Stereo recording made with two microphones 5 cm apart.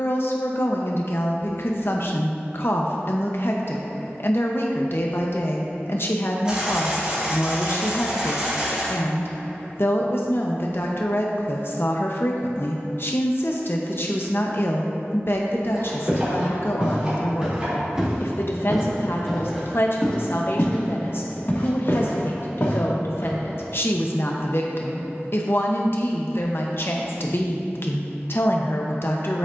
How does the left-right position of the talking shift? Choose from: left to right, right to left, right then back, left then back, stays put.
stays put.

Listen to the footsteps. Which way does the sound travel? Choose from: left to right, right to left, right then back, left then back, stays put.
right to left.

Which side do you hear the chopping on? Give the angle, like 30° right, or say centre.
20° right.